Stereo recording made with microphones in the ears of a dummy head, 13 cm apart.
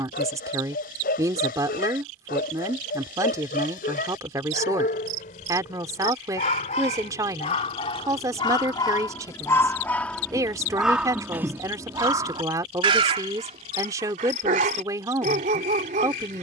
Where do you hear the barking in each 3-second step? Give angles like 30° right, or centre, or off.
60° left, 60° left, 40° left, centre, 40° right, 50° right.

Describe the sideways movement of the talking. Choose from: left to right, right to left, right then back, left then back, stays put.
stays put.